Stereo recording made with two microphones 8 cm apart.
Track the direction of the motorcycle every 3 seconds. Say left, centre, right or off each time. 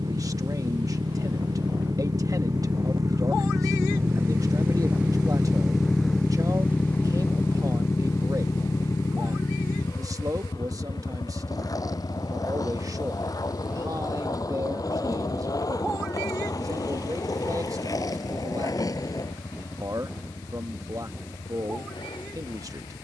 right, right, left, left, left, left, left, left.